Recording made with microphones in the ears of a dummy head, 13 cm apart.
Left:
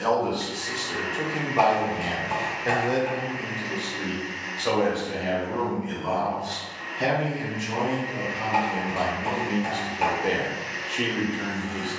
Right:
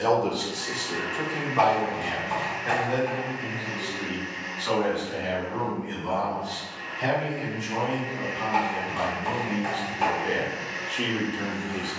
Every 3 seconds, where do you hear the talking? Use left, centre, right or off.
centre, left, left, left.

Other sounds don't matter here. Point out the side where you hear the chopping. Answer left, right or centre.
centre.